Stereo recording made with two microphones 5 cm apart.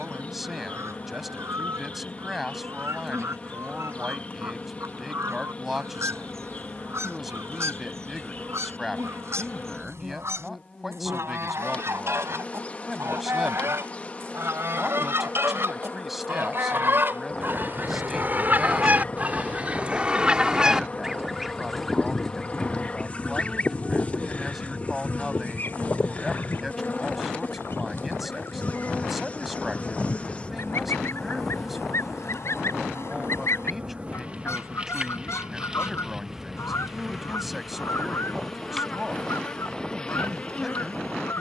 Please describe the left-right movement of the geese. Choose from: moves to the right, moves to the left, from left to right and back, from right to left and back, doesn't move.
moves to the left.